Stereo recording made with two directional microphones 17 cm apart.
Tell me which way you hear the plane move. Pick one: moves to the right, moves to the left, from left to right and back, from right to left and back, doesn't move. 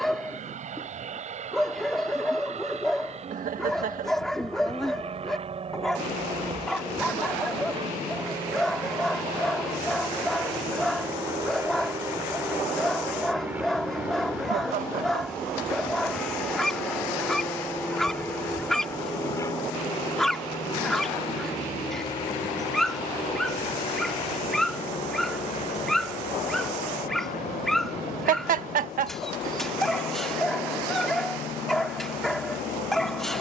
moves to the left.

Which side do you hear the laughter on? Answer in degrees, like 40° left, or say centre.
50° right.